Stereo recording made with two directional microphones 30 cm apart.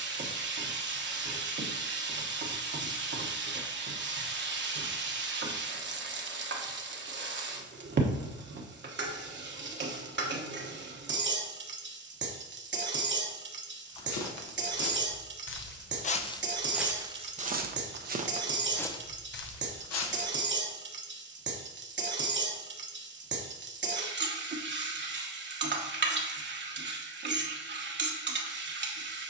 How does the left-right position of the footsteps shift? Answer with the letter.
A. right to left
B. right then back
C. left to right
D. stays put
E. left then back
B.